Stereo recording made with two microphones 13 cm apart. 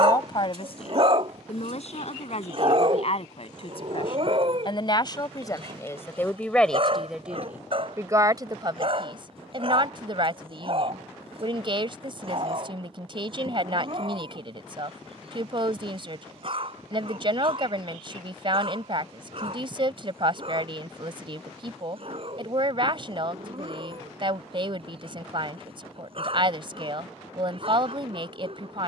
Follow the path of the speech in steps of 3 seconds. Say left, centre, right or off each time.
left, left, centre, right, right, right, right, right, right, right.